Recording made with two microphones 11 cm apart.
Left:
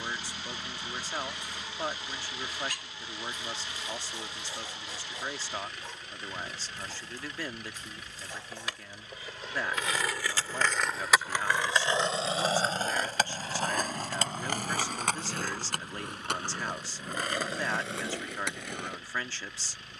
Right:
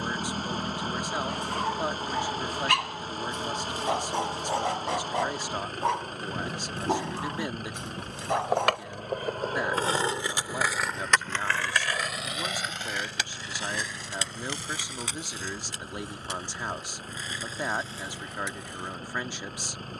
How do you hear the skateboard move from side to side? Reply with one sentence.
You can hear the skateboard move to the left.